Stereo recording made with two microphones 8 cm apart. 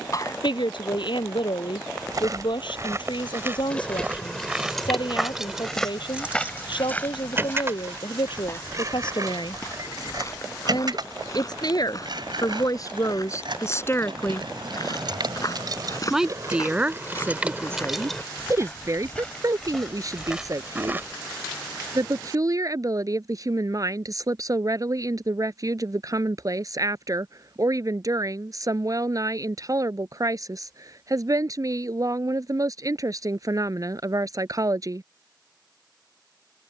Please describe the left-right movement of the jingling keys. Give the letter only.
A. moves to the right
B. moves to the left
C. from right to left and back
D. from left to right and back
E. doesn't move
D.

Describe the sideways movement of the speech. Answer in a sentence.
You can hear the speech move from left to right.